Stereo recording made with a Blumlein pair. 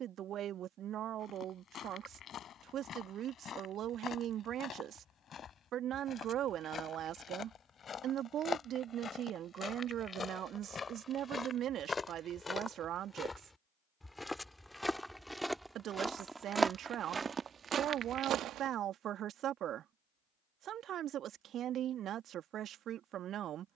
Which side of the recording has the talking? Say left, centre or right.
right.